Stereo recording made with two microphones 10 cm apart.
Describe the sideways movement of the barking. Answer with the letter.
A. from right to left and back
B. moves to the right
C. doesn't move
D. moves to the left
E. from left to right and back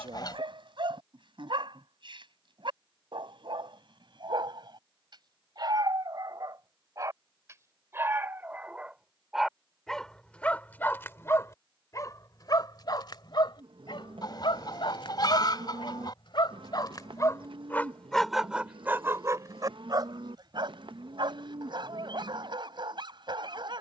A.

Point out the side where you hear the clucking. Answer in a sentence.
In this clip you hear the clucking on the left.